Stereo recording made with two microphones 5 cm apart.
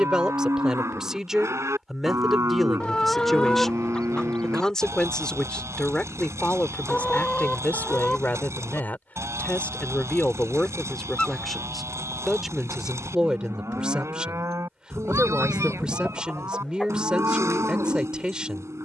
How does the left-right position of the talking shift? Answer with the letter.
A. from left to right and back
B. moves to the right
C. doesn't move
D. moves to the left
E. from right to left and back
E.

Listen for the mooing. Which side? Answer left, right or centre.
right.